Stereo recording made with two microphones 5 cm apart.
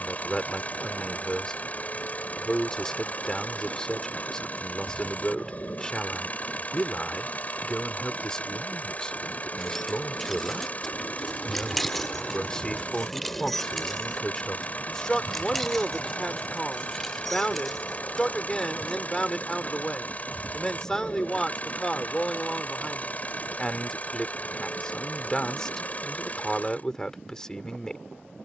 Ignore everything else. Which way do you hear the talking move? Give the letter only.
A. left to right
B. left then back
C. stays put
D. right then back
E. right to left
C.